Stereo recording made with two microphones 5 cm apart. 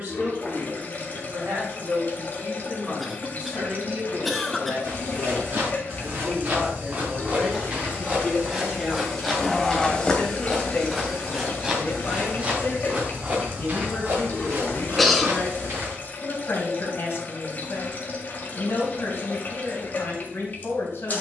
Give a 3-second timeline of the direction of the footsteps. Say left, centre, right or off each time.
off, right, right, centre, right, right, off.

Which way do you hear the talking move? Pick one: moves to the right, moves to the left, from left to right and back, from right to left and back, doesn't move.
moves to the left.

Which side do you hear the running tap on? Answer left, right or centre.
left.